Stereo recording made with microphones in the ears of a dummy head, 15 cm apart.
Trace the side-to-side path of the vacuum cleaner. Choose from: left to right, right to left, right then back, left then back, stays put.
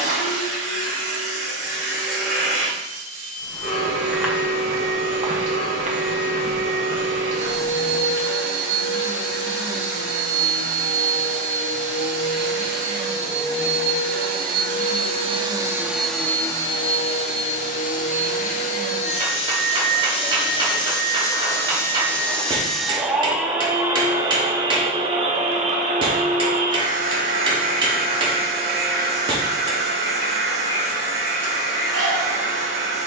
left then back.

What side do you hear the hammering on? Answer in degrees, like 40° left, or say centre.
30° right.